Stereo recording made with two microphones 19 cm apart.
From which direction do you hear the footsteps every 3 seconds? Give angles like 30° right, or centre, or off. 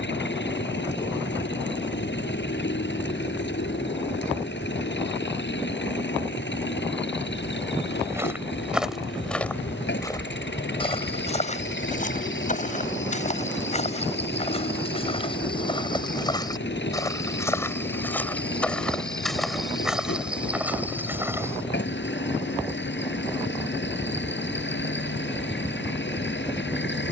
off, off, 10° right, 20° left, 40° left, 20° left, centre, 10° right, off.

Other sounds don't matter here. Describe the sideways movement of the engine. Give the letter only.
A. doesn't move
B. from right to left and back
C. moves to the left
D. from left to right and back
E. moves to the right
A.